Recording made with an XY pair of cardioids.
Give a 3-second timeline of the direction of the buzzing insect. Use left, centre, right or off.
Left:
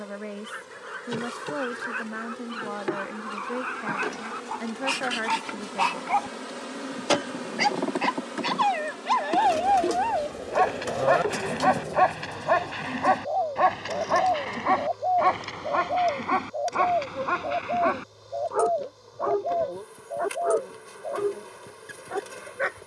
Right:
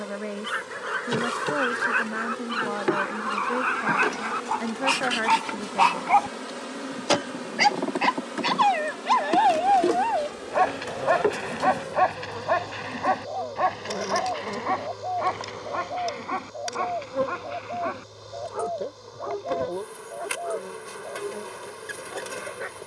right, right, centre, right, right, right, right, right.